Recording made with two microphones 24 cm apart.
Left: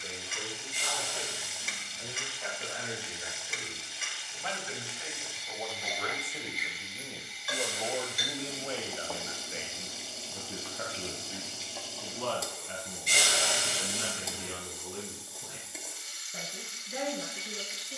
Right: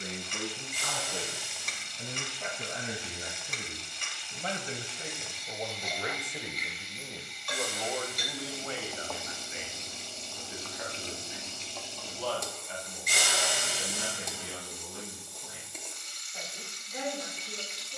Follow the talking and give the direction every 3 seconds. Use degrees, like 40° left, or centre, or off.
60° right, 40° right, 10° left, 50° left, 70° left, 70° left.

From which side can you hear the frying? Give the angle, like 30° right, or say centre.
centre.